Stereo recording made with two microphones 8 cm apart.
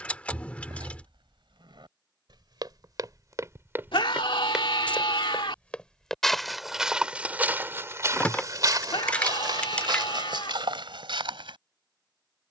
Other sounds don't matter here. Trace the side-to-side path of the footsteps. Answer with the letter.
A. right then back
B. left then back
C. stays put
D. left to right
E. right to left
B.